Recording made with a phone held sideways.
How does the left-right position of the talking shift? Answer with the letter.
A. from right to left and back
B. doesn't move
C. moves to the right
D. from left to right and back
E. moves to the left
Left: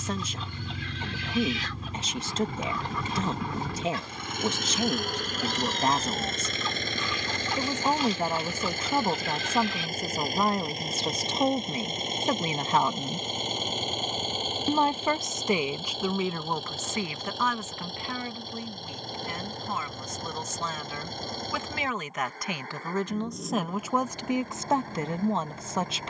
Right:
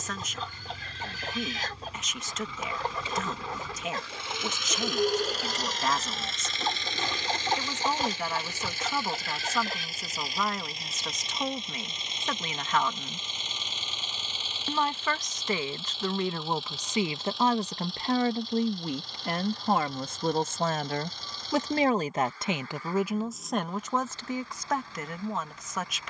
D.